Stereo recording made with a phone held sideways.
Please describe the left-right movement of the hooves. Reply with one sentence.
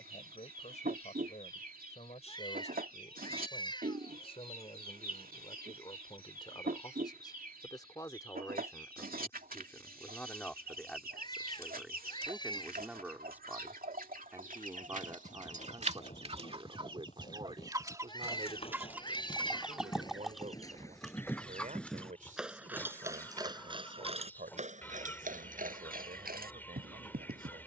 In this clip you hear the hooves move to the right.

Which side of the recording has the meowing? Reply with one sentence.
In this clip you hear the meowing on the left.